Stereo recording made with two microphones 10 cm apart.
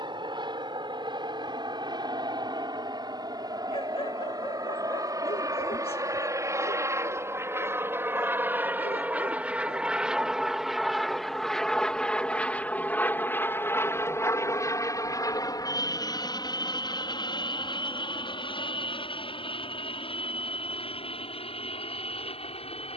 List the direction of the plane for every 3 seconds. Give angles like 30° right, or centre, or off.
50° right, 40° right, 30° right, centre, 20° left, 40° left, 50° left, 60° left.